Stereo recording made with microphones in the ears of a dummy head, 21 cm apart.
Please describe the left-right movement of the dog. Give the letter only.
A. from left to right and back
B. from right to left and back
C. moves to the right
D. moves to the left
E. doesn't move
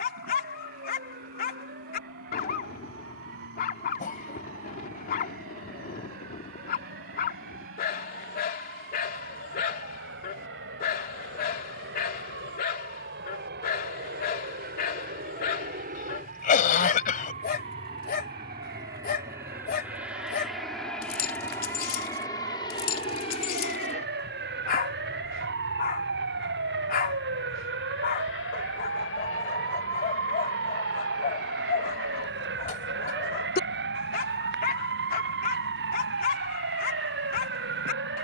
E.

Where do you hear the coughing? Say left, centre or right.
left.